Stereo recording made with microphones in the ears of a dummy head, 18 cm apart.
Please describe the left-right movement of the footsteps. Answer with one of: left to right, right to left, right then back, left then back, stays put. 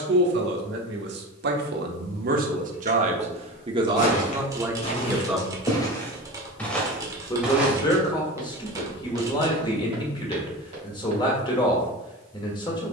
left to right.